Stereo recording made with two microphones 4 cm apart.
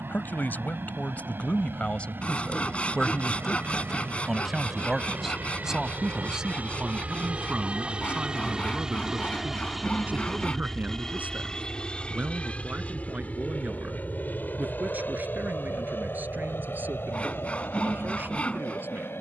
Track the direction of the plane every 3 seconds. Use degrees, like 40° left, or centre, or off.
70° right, 50° right, 30° right, 10° left, 40° left, 50° left, 60° left.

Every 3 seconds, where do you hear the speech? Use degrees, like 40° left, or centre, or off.
40° left, centre, 30° right, 40° right, 40° right, 50° right, 50° right.